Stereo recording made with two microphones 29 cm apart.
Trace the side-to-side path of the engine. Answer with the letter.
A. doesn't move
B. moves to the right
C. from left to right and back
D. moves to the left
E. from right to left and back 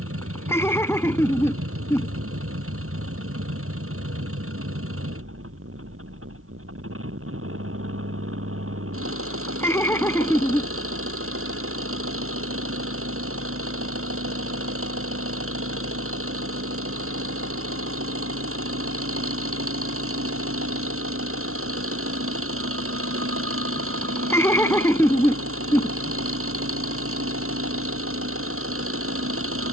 A.